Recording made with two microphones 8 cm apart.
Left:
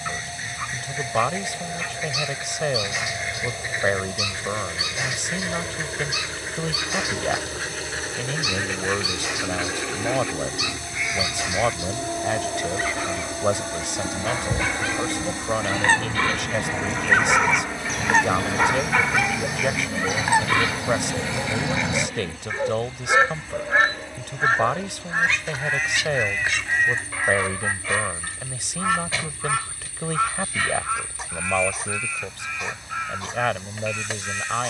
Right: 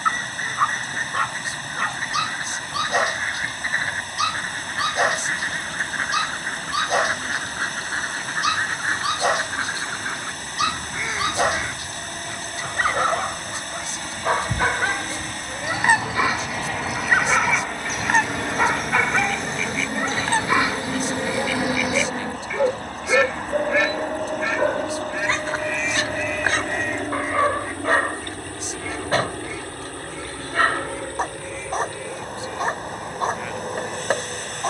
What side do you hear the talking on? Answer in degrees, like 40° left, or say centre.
70° left.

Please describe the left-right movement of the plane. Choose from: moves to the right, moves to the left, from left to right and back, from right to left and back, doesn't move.
moves to the right.